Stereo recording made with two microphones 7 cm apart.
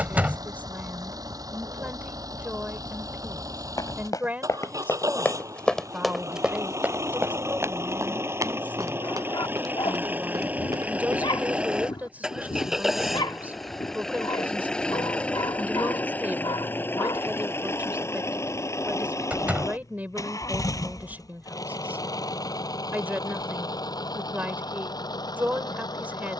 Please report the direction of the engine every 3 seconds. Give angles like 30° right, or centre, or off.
60° right, 50° right, 40° right, 20° right, centre, 30° left, 40° left, 60° left, 60° left.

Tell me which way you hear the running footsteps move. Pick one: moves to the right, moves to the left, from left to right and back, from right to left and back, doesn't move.
moves to the right.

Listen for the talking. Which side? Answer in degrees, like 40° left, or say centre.
20° right.